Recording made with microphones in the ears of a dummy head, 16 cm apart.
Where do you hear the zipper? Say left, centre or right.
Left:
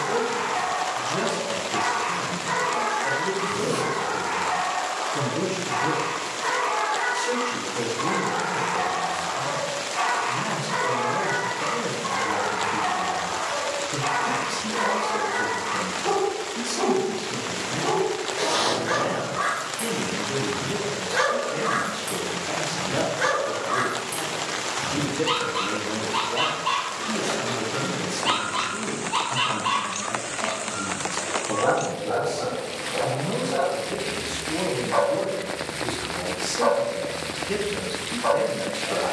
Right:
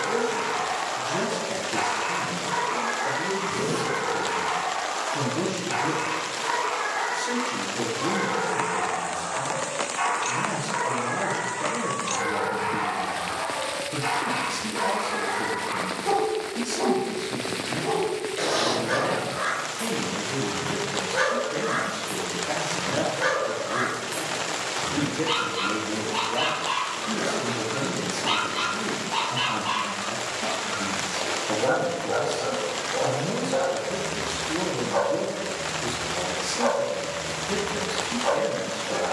left.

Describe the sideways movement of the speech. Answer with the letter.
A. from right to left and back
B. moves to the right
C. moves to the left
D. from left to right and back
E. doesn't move
E.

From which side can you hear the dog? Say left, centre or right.
left.